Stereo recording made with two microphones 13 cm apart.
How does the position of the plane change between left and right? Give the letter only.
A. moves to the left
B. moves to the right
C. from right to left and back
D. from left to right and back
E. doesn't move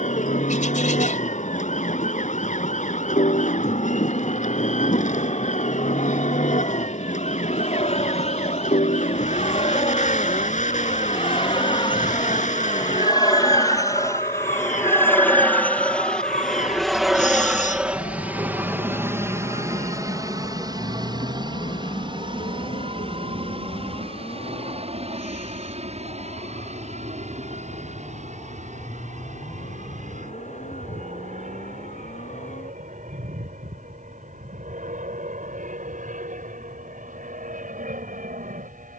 B.